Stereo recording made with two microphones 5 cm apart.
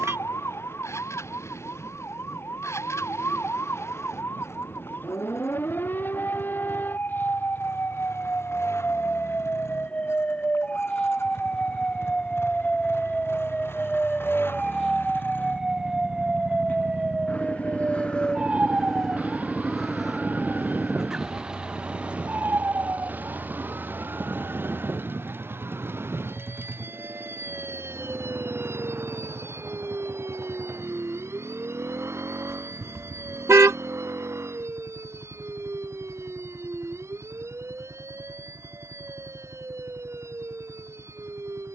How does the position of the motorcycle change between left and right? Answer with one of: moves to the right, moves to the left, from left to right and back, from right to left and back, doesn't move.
moves to the right.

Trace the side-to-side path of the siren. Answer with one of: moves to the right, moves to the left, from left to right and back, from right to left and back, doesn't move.
moves to the right.